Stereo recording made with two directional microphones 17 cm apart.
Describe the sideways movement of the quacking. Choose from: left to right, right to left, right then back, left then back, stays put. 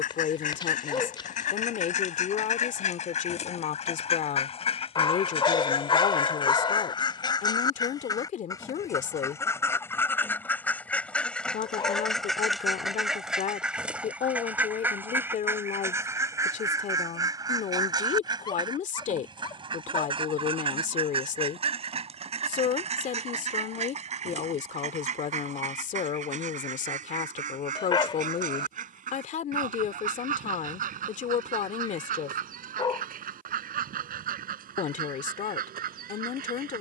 left to right.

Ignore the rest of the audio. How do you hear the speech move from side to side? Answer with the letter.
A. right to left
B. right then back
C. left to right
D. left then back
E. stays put
E.